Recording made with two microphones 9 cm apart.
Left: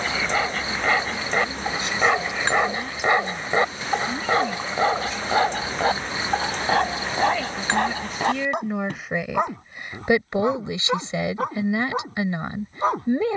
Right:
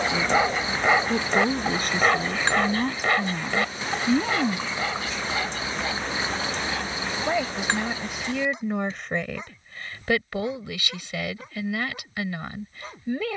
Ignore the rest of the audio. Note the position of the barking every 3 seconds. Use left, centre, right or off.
centre, left, left, left, left.